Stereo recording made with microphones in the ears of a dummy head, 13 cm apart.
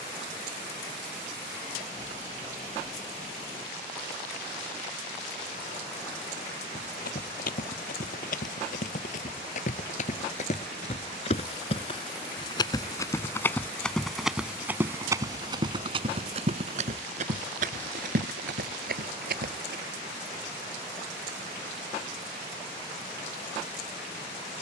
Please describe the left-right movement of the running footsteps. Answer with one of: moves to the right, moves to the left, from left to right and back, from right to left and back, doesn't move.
moves to the right.